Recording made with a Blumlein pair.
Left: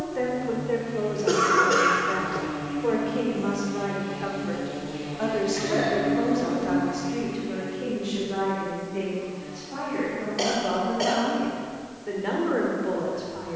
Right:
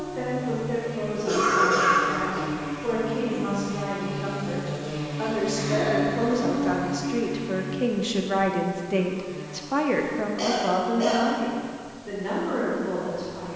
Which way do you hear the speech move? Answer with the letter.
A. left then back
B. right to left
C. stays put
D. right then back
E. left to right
D.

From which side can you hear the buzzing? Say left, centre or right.
right.